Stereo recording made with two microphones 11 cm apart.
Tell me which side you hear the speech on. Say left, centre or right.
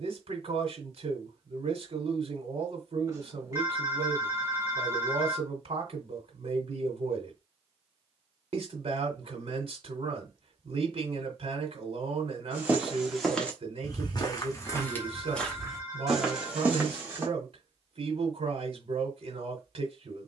right.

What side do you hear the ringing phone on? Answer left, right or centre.
right.